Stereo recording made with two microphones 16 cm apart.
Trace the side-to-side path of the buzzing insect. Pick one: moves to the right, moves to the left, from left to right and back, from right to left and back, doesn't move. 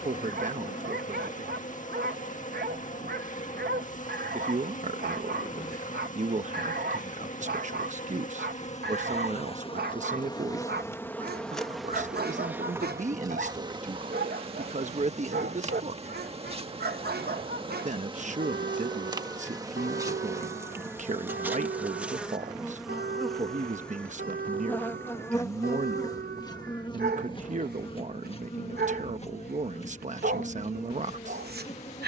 from left to right and back.